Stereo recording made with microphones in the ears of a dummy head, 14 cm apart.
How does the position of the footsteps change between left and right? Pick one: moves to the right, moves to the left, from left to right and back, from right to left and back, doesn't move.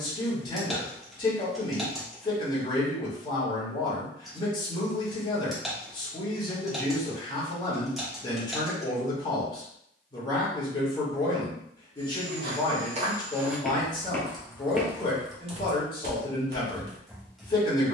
from right to left and back.